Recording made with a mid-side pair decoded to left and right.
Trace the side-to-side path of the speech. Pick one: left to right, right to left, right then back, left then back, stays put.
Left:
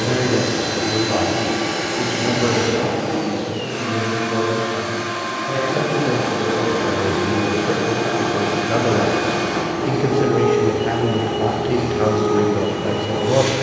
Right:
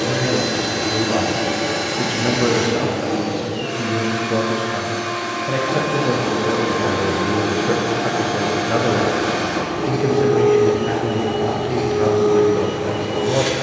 right then back.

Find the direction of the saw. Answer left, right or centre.
right.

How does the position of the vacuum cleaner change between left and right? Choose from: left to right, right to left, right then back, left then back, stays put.
stays put.